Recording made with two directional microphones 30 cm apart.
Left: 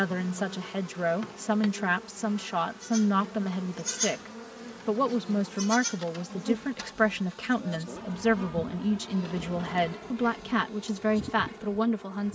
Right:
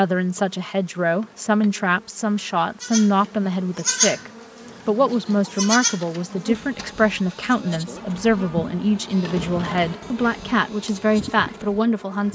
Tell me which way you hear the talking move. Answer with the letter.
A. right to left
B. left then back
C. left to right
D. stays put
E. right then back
D.